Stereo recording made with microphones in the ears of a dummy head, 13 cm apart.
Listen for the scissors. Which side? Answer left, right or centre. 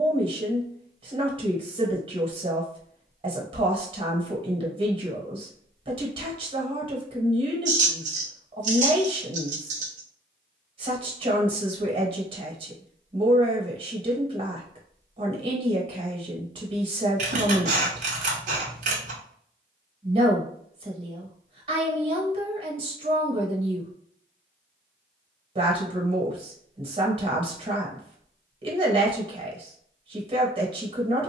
right.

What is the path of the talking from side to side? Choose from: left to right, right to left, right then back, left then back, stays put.
stays put.